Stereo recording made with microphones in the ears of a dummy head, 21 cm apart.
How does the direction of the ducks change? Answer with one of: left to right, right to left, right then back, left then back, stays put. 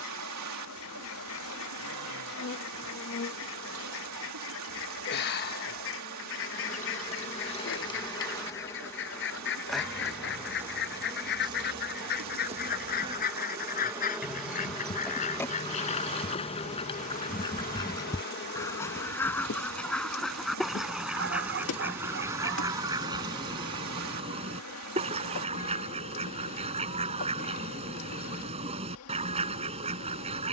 left to right.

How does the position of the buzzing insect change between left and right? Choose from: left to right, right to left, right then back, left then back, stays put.
right then back.